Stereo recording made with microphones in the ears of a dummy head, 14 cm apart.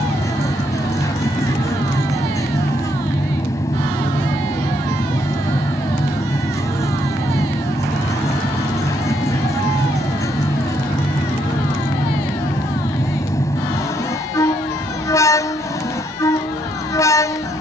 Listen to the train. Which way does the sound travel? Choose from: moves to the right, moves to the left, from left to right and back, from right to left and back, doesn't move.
doesn't move.